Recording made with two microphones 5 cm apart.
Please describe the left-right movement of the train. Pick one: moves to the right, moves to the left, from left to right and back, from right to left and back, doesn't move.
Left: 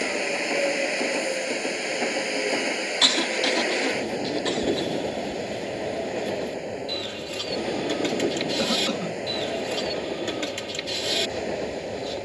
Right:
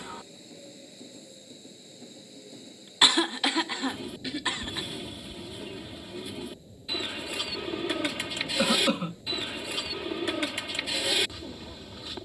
doesn't move.